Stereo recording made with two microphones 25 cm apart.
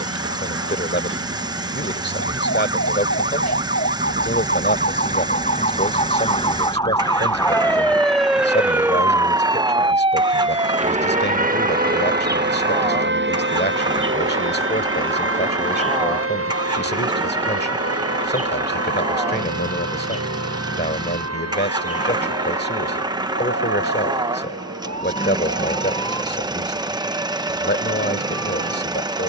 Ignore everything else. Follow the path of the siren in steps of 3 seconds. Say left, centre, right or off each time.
left, left, centre, right, right, right, right, right, right, right.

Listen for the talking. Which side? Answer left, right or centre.
left.